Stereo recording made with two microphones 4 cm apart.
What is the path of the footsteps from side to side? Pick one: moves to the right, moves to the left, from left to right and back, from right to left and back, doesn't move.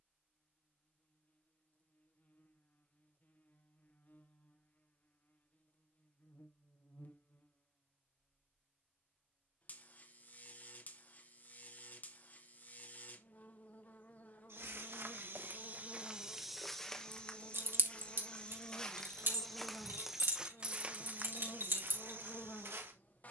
from right to left and back.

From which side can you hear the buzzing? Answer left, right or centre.
left.